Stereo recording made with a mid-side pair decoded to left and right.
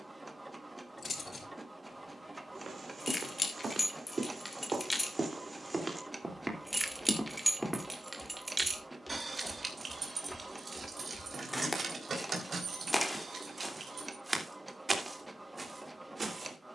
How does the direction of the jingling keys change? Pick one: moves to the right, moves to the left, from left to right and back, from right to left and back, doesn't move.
moves to the right.